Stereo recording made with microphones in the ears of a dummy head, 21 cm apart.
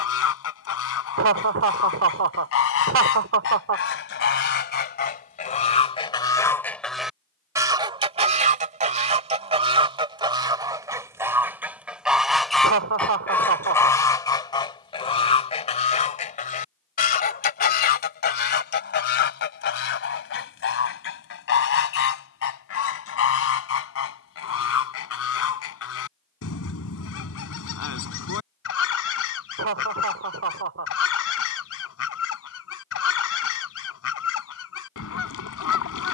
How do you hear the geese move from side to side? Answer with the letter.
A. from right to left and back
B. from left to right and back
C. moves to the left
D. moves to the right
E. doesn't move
B.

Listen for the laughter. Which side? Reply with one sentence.
In this clip you hear the laughter on the right.